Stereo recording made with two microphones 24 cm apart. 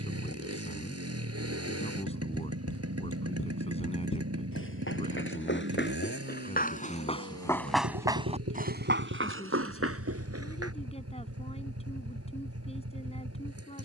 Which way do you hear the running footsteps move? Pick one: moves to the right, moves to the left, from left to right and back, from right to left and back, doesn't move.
moves to the right.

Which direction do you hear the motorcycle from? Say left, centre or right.
right.